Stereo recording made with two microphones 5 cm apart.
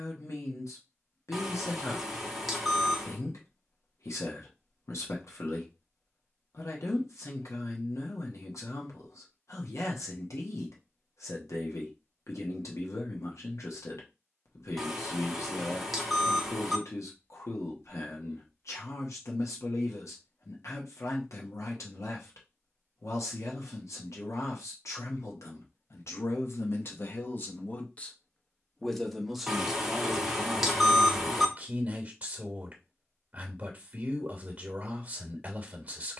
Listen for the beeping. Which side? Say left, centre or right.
centre.